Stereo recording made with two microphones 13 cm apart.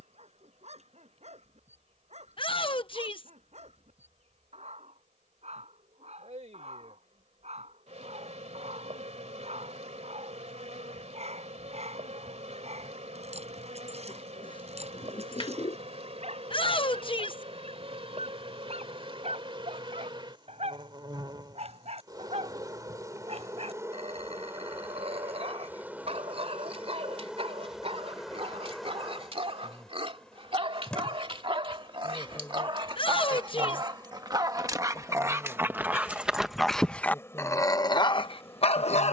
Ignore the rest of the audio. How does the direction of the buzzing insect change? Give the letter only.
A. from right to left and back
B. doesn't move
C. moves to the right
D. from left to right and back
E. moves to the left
E.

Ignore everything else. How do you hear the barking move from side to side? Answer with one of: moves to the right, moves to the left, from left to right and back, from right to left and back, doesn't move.
moves to the left.